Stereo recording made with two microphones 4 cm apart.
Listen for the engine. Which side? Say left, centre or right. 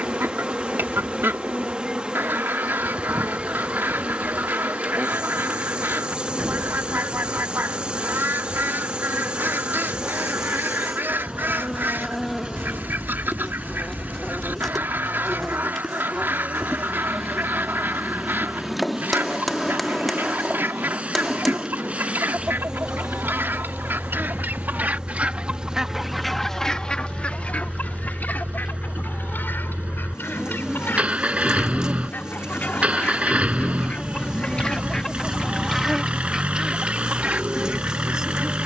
right.